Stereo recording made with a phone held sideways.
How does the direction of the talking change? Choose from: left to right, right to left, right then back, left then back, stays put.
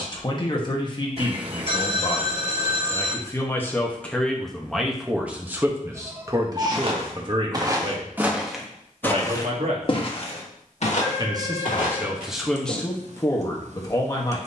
right then back.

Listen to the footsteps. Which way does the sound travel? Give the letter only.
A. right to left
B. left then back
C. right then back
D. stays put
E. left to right
A.